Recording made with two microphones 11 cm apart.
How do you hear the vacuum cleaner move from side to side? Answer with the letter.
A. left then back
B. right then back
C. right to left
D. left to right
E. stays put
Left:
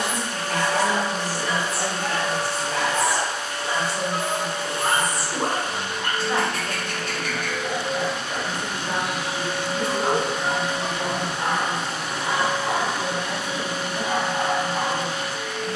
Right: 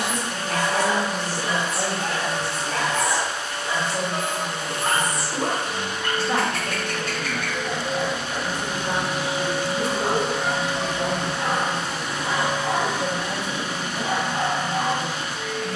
B.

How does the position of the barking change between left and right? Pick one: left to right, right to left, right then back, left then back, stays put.
right to left.